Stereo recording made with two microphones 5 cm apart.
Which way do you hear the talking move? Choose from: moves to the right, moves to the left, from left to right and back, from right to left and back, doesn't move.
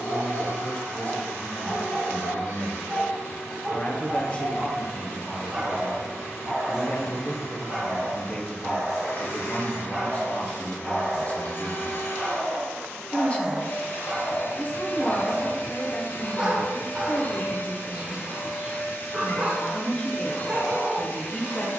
doesn't move.